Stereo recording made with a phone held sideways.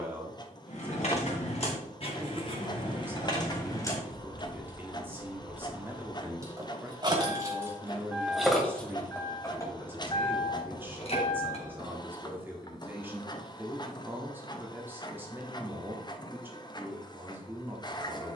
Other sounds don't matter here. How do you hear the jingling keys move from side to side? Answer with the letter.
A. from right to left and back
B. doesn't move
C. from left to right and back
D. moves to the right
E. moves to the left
C.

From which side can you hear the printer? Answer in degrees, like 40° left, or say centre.
30° left.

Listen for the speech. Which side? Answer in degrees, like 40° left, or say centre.
10° right.